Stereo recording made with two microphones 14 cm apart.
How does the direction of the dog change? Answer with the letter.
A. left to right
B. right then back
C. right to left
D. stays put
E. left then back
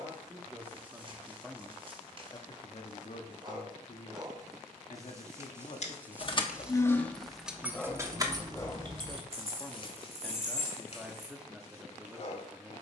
C.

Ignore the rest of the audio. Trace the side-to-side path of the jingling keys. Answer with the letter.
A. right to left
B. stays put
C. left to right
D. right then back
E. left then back
C.